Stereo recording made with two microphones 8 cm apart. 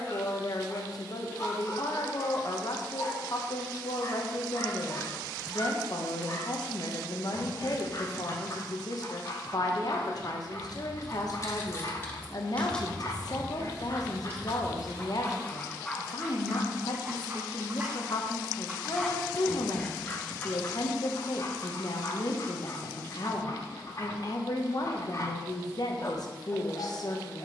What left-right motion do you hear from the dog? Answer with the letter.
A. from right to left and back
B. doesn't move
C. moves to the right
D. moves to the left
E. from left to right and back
E.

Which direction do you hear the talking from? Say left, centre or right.
left.